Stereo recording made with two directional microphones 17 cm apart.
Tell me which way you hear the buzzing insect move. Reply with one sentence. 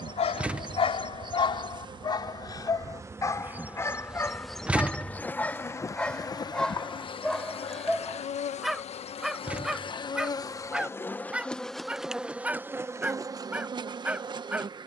You can hear the buzzing insect move from right to left and back again.